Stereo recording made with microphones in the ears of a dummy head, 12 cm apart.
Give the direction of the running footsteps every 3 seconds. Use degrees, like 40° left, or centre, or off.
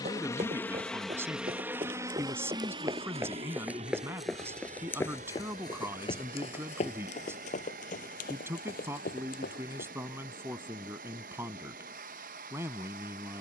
40° right, 10° left, 50° left, 70° left, off.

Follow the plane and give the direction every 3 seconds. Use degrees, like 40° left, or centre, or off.
10° right, 50° right, 60° right, 70° right, 70° right.